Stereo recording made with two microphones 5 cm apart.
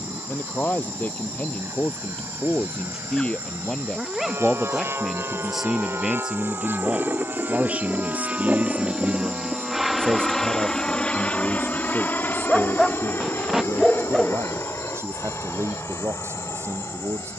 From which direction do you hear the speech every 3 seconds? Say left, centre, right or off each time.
left, centre, right, right, right, right.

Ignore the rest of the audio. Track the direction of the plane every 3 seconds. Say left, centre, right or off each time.
right, right, right, centre, left, left.